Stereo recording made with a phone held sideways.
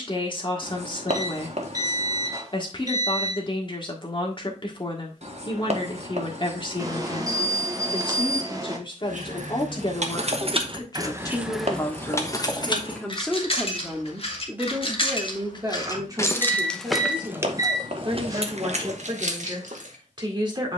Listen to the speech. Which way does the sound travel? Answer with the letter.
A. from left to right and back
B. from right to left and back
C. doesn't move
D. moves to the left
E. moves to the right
E.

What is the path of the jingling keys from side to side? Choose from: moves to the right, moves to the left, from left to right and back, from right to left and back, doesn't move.
from right to left and back.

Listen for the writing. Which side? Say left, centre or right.
right.